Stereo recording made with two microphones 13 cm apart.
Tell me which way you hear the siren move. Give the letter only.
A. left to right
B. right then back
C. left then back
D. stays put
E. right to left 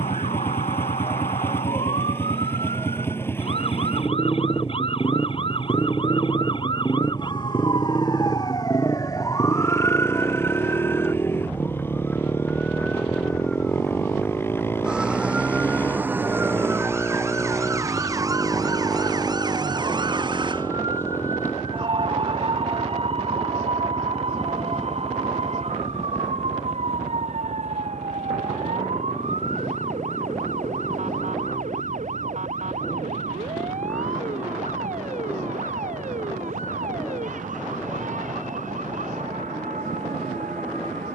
A.